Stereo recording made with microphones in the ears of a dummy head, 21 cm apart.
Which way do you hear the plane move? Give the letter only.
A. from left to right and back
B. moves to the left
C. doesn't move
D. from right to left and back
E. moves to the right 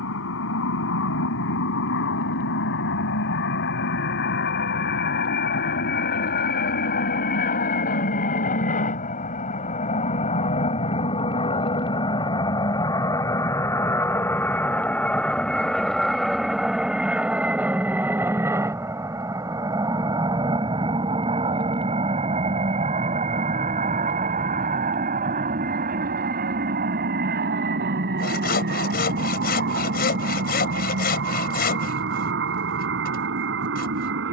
E.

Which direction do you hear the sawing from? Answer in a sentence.
You can hear the sawing on the left.